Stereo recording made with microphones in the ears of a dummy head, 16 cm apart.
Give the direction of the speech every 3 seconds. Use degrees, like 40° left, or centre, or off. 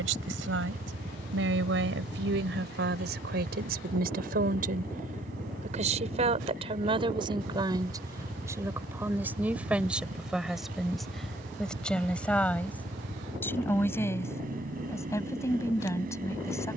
70° right, 50° right, 30° right, centre, 10° left, 20° left.